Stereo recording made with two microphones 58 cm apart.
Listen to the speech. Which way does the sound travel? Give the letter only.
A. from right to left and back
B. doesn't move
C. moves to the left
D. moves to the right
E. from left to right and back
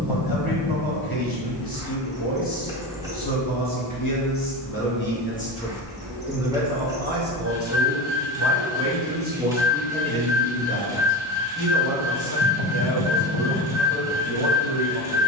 E.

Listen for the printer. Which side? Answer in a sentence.
In this clip you hear the printer in the centre.